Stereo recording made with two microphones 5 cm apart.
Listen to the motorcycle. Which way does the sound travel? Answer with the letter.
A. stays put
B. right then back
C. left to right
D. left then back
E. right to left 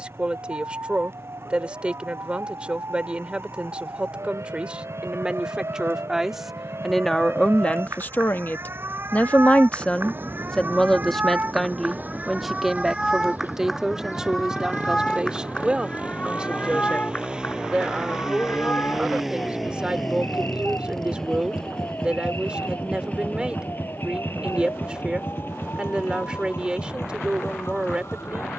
E.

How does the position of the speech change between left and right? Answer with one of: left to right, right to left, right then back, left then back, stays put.
left then back.